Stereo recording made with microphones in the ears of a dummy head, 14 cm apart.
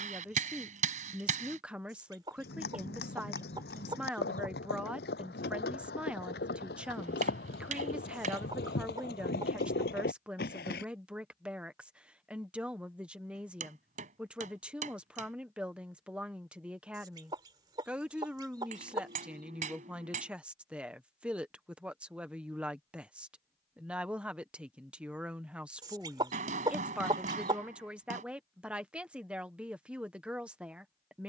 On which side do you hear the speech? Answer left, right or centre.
centre.